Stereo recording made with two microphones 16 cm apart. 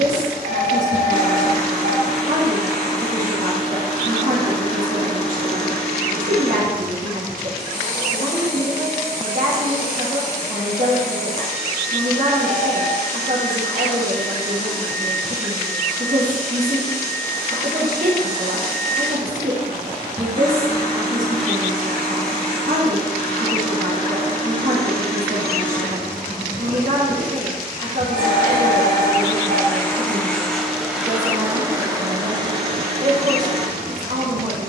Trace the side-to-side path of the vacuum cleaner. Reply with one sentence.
In this clip you hear the vacuum cleaner travel towards the right.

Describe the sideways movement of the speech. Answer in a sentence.
You can hear the speech stay put.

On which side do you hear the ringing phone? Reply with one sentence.
In this clip you hear the ringing phone on the right.